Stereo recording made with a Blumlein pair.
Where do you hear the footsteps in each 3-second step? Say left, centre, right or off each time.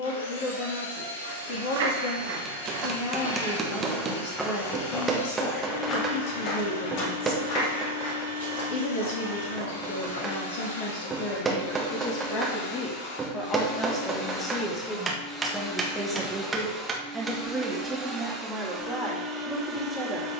right, centre, left, left, off, off, off.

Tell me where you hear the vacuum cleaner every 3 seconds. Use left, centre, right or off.
left, left, left, left, left, centre, centre.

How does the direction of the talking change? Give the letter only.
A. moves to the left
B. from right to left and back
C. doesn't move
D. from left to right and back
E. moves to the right
E.